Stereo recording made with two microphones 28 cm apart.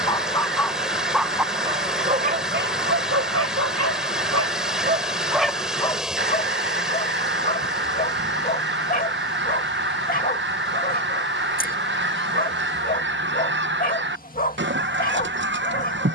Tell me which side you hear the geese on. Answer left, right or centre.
right.